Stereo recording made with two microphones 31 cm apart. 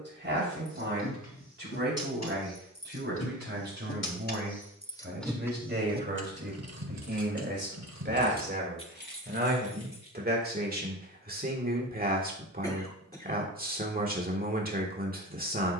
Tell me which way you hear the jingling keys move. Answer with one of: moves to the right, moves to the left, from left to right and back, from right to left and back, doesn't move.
from left to right and back.